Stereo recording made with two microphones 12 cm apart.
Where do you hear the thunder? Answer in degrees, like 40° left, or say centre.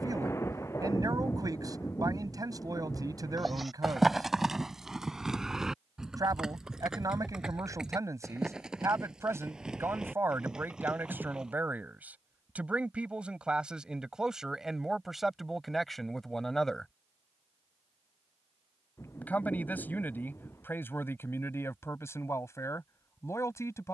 20° left.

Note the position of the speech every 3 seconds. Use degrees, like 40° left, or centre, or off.
30° right, 30° right, 30° right, 20° right, 10° right, centre, 20° left, 20° left.